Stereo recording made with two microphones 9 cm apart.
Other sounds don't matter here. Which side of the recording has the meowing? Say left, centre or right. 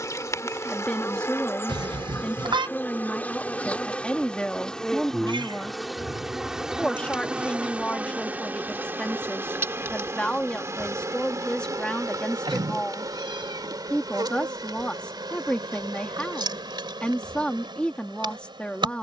right.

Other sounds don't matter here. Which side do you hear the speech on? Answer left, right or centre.
centre.